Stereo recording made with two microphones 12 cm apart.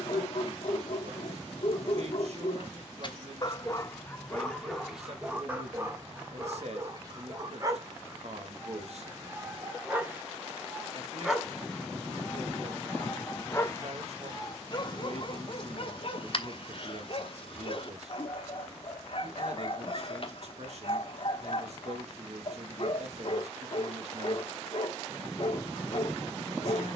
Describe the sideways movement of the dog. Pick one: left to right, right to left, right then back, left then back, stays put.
right then back.